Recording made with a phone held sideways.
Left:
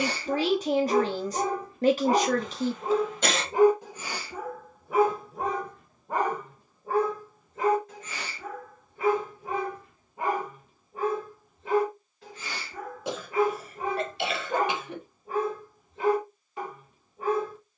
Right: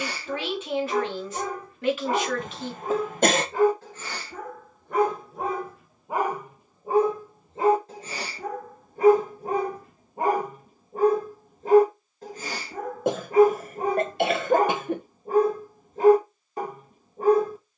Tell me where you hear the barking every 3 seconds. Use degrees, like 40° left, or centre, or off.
30° left, 10° left, 30° right, 40° right, 40° right, 40° right.